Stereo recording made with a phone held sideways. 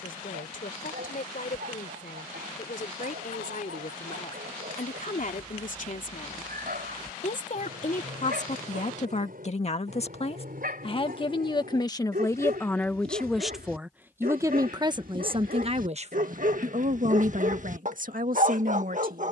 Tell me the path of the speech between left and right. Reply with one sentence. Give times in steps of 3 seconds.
You can hear the speech on the left from 0 s, in the centre from 12 s and on the right from 15 s.